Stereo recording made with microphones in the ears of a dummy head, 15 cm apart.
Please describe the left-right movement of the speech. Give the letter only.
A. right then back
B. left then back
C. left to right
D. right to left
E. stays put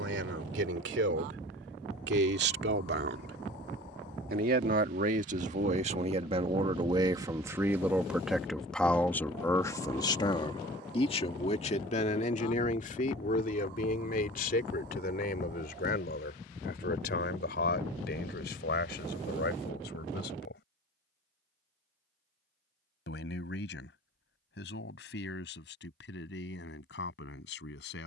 D.